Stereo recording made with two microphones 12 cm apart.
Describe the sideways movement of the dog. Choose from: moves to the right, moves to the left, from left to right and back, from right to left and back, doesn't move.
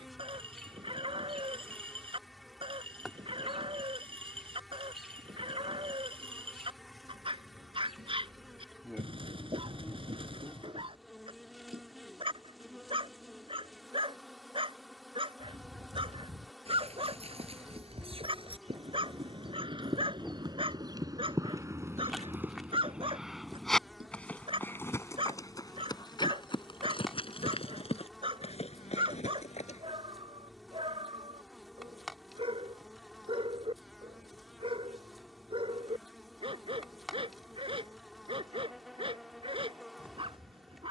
doesn't move.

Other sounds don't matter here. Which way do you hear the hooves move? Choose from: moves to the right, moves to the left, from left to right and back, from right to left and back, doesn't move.
moves to the left.